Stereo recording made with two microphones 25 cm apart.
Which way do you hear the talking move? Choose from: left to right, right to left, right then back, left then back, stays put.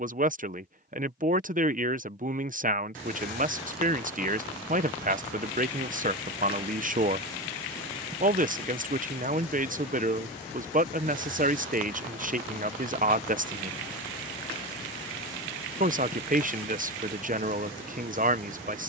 stays put.